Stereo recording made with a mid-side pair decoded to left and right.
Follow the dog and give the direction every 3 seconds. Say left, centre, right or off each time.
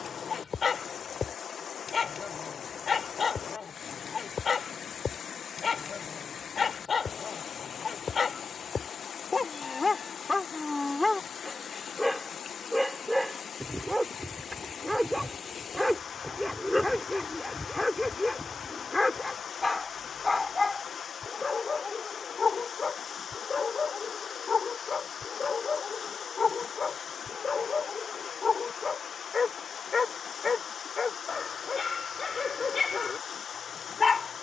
left, left, left, left, centre, centre, left, left, left, left, left, left.